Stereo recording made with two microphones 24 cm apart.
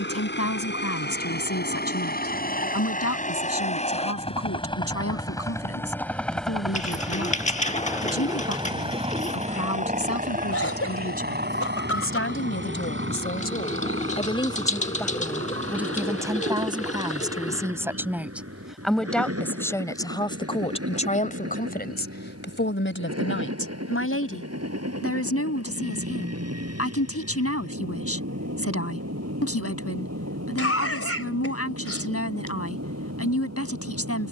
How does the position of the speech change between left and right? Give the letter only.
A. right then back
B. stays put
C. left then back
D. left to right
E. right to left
A.